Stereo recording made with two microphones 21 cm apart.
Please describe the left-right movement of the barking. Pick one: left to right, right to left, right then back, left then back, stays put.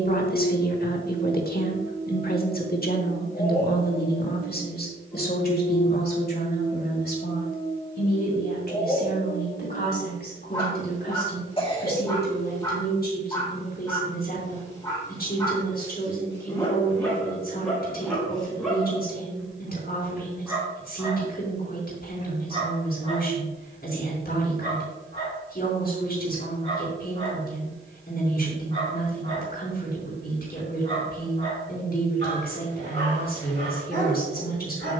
left to right.